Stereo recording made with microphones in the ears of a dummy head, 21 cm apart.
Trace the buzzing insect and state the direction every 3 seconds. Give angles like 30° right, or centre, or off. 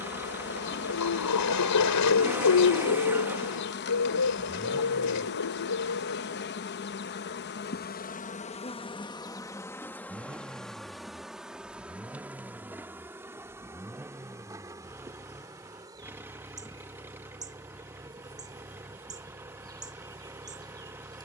50° left, 50° left, 40° left, centre, 10° right, 20° right, 20° right.